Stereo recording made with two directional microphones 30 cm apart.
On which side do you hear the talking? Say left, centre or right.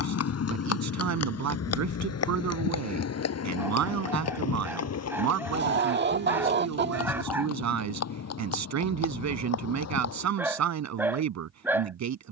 right.